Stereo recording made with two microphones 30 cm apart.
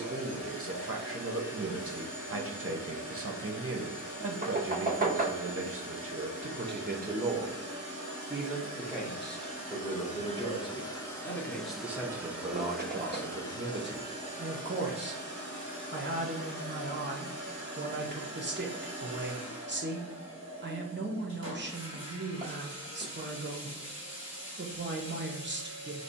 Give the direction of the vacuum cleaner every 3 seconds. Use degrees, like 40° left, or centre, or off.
50° left, 50° left, 50° left, 20° left, 10° left, 40° left, 50° left, 50° left, 50° left.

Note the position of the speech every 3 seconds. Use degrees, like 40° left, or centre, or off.
40° right, 40° right, 20° right, 10° left, 30° right, 40° right, 40° right, 40° right, 40° right.